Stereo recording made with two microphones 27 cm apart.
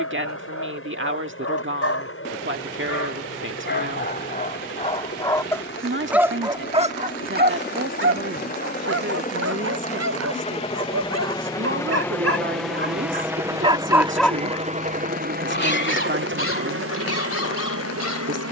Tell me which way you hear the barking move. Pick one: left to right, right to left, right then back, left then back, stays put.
right then back.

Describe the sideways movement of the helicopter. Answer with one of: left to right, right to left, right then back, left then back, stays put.
left to right.